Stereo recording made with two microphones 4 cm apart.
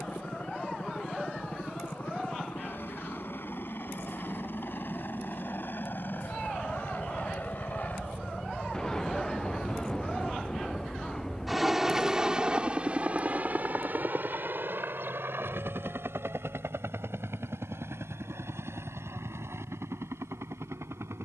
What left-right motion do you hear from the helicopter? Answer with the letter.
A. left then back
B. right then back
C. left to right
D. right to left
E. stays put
C.